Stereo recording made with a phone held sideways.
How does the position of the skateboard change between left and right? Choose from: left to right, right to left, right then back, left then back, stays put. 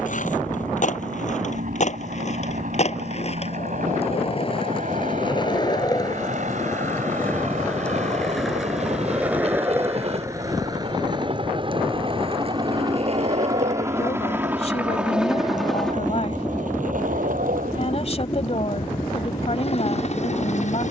left to right.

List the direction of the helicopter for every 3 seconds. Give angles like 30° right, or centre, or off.
60° right, 60° right, 50° right, 40° right, 20° right, 10° left, 40° left.